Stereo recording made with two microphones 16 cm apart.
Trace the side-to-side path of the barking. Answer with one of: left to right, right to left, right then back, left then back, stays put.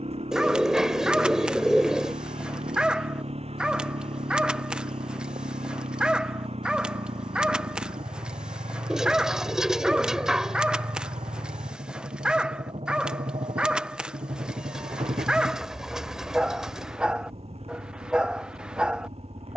stays put.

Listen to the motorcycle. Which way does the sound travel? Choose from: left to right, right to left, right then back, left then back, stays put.
stays put.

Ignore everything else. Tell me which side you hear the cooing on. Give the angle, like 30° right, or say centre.
centre.